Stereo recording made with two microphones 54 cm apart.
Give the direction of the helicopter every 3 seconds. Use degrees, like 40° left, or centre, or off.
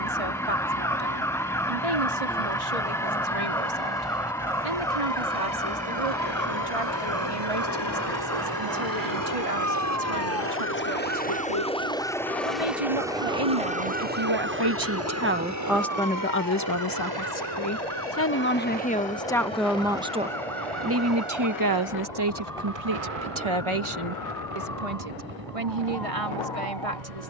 70° left, 60° left, 50° left, 20° left, 10° right, 30° right, 50° right, 60° right, 60° right.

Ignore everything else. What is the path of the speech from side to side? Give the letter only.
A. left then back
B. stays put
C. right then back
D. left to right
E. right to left
A.